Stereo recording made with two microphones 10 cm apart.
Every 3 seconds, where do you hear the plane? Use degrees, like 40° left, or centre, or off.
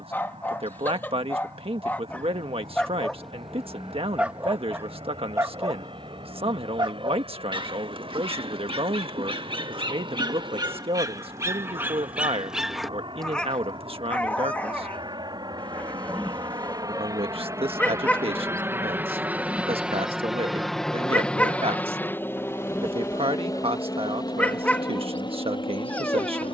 80° right, 70° right, 70° right, 70° right, 60° right, 40° right, 10° right, 20° left, 50° left.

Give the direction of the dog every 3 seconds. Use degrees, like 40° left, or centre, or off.
20° left, 20° right, 50° right, 40° right, 10° left, 20° left, 20° left, 20° left, 20° left.